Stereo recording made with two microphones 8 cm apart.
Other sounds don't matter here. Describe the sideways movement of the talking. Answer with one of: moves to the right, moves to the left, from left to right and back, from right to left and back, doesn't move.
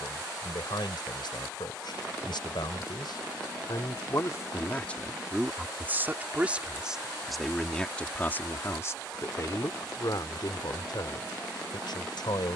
from left to right and back.